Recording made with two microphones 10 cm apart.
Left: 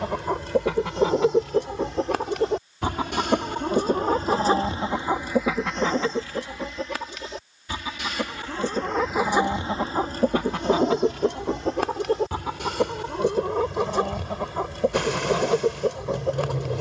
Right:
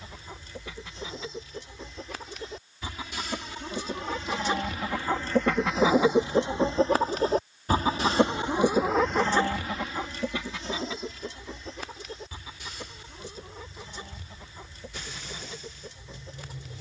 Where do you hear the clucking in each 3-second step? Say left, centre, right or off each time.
left, left, right, left, left, left.